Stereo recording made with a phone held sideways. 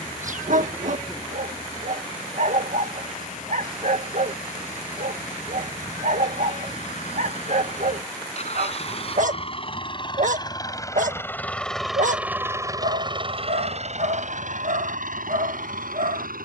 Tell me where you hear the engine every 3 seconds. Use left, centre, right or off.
left, left, left, left, right, right.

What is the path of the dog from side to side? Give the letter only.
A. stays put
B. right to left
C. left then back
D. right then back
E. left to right
A.